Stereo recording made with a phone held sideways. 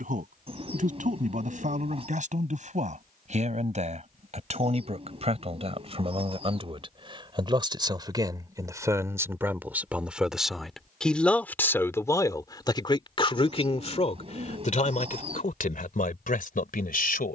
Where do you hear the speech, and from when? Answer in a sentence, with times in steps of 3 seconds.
In this clip you hear the speech on the right from 0 s, in the centre from 9 s and on the left from 12 s.